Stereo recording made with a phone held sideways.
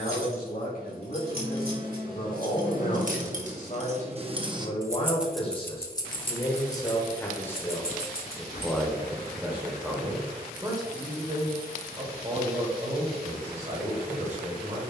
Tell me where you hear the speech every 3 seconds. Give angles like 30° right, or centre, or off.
60° left, 40° left, 10° left, 20° right, 40° right.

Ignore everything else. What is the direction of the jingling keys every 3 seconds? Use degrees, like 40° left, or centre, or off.
60° right, 20° right, 50° left, off, off.